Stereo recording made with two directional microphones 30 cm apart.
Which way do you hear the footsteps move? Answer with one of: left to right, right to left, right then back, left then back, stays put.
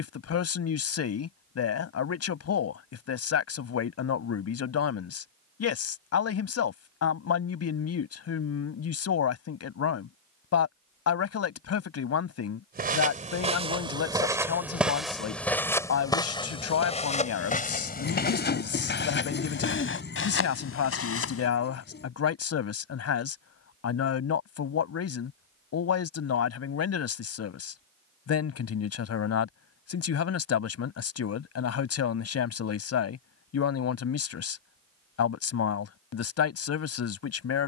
right to left.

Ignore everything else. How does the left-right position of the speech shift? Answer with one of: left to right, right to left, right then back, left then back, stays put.
stays put.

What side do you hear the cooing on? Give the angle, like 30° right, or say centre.
30° left.